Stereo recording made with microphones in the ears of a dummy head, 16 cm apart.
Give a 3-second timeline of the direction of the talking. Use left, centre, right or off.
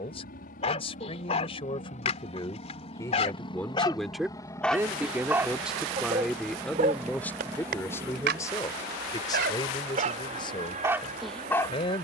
left, centre, centre, left.